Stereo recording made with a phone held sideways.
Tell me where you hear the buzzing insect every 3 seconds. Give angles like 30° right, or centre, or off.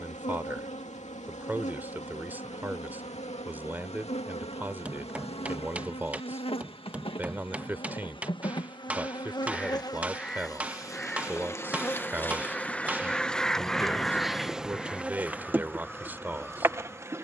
50° left, 40° left, 30° left, 20° left, centre, 10° right.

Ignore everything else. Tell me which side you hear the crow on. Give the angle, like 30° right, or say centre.
centre.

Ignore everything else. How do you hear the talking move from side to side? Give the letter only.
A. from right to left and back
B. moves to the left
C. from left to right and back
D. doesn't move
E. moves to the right
D.